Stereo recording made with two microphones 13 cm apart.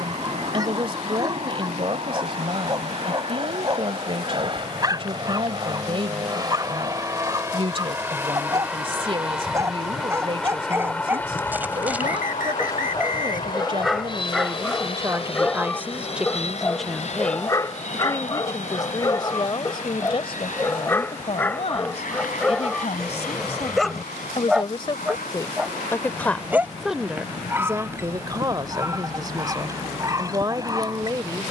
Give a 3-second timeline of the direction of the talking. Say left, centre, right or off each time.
right, right, right, right, right, centre, left, left, left, right, right.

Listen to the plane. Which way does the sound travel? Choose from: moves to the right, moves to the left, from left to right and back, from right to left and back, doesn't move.
moves to the left.